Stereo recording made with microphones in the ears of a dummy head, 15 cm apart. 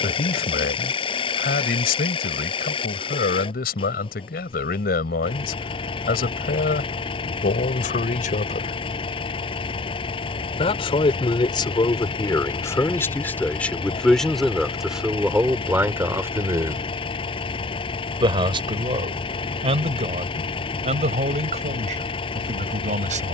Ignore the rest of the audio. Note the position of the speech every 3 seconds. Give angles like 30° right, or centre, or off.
60° left, 60° left, 60° left, 30° left, 10° left, 10° right, 30° right, 40° right.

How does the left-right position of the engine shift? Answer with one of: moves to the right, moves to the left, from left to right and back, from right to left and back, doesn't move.
doesn't move.